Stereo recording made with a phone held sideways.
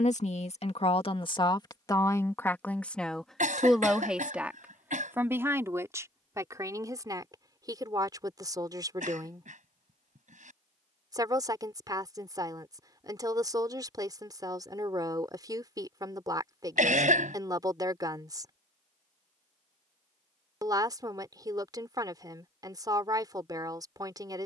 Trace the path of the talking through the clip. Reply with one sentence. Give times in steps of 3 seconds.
You can hear the talking on the left from 0 s, in the centre from 3 s and on the right from 6 s.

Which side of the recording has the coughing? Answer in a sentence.
In this clip you hear the coughing on the right.